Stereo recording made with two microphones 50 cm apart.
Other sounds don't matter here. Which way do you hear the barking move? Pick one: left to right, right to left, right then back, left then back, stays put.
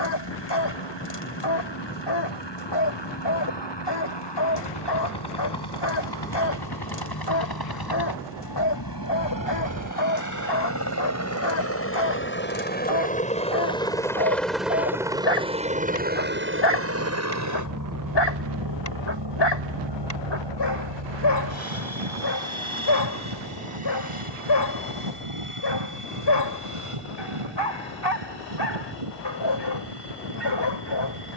stays put.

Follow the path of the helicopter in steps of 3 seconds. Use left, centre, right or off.
left, left, left, left, centre, right, right, right, right, right, right.